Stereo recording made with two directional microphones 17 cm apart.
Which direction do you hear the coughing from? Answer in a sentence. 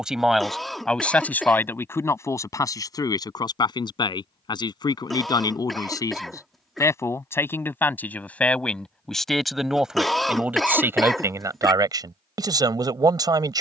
In this clip you hear the coughing in the centre.